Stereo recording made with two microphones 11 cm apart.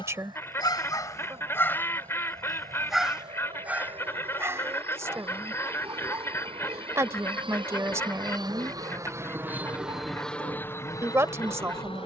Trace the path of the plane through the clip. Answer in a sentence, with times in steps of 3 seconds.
In this clip you hear the plane on the right from 0 s and in the centre from 9 s.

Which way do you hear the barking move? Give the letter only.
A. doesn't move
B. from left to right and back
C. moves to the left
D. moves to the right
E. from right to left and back
D.